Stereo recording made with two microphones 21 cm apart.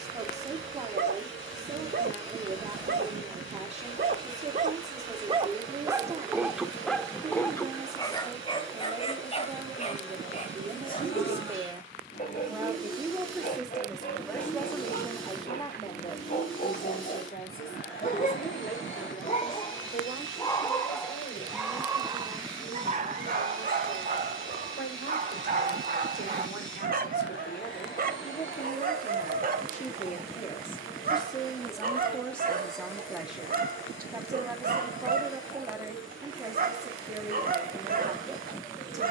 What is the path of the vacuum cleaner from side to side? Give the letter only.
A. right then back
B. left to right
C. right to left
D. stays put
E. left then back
D.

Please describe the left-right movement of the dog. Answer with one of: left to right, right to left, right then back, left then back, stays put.
left then back.